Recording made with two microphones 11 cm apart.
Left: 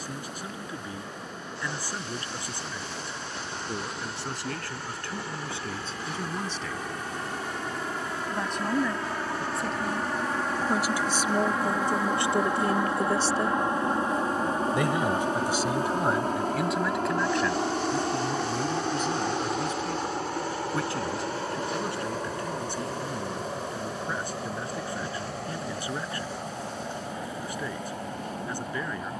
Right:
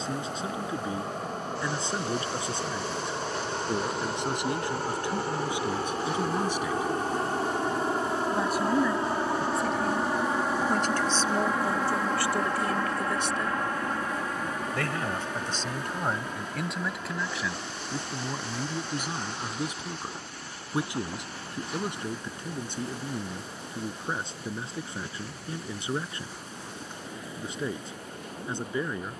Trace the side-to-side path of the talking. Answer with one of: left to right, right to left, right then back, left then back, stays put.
left then back.